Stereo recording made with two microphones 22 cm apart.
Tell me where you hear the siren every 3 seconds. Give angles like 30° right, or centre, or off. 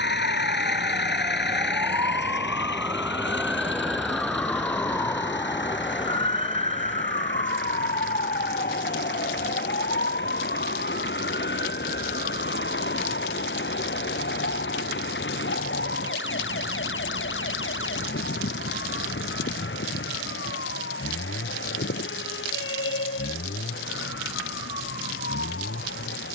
30° right, 10° left, 30° left, 40° left, 50° left, 60° left, 60° left, 60° left, 70° left.